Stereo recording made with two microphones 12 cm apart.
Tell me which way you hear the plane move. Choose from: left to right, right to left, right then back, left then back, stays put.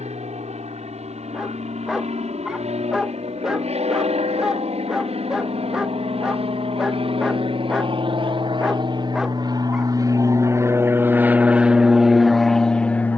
right to left.